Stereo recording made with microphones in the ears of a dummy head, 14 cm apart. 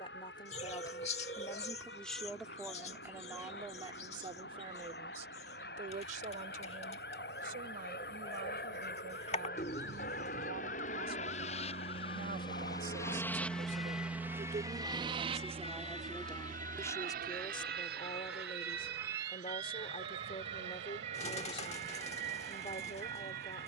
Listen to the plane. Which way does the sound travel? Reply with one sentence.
You can hear the plane travel towards the right.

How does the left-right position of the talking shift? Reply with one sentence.
In this clip you hear the talking go right and come back.